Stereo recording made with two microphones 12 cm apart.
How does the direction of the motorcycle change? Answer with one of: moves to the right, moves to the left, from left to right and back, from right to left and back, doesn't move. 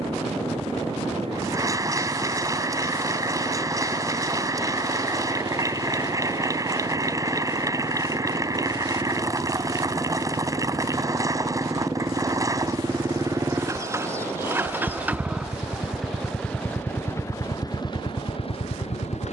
moves to the left.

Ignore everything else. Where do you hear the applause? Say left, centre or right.
right.